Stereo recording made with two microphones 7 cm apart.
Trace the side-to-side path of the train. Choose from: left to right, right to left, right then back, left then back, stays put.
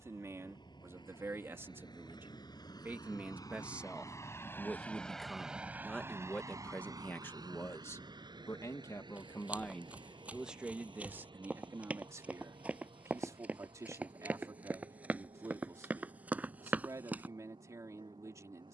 left to right.